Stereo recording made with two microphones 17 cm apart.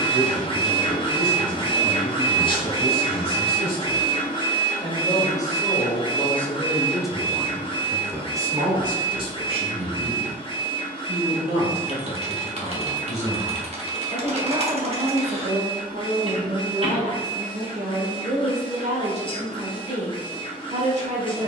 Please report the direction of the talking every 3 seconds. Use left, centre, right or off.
left, left, centre, right, right, right, right.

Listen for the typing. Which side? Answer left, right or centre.
right.